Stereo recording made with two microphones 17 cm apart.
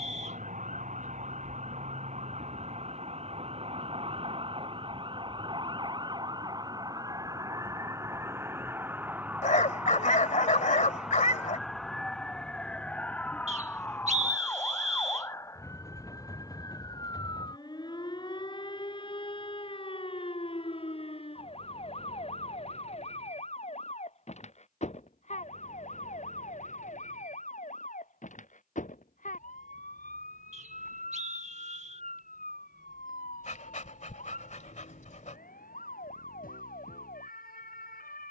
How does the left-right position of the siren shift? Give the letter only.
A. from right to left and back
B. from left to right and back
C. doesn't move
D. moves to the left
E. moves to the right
D.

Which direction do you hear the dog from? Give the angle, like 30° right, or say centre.
50° left.